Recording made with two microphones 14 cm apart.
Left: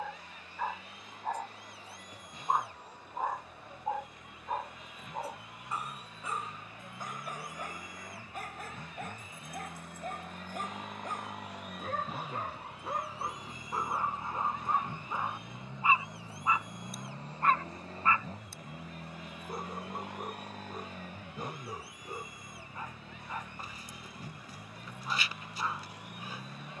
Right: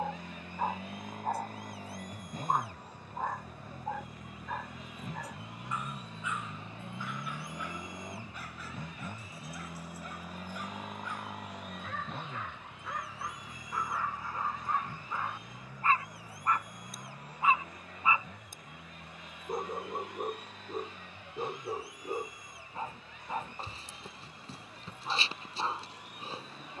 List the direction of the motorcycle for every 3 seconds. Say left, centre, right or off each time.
right, right, right, centre, centre, left, left, left, left.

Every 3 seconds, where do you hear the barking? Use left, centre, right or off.
centre, left, left, left, left, centre, right, right, right.